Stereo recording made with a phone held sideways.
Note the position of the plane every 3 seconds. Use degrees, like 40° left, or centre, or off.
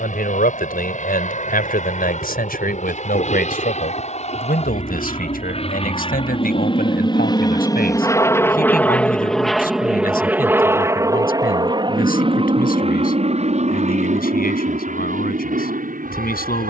60° left, 50° left, 30° left, 10° right, 40° right, 60° right.